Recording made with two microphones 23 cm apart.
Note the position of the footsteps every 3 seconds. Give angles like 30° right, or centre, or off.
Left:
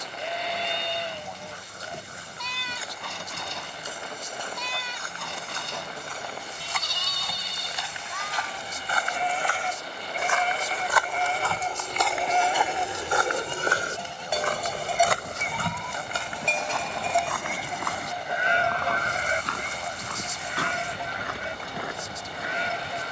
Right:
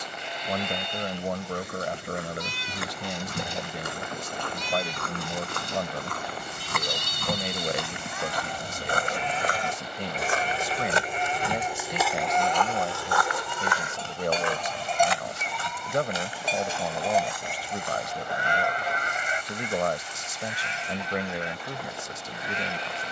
70° right, 70° right, 60° right, 30° right, 30° left, 70° left, 80° left, 80° left.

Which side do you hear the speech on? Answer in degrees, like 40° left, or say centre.
80° right.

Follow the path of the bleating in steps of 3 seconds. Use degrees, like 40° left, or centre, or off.
70° left, 70° left, 70° left, 50° left, 20° left, centre, 40° left, 60° left.